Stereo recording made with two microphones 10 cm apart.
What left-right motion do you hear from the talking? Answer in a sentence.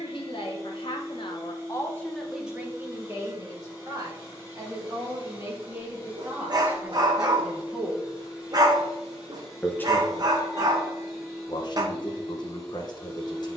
In this clip you hear the talking go right and come back.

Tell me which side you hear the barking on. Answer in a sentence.
In this clip you hear the barking on the right.